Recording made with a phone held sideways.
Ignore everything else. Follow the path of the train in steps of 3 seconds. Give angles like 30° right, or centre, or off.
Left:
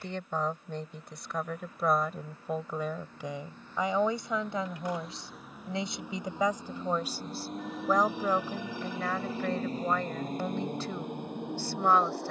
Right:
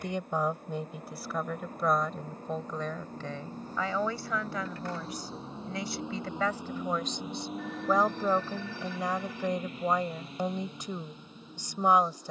50° right, 30° right, centre, 50° left.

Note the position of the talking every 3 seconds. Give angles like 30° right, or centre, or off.
centre, 20° left, centre, 20° right.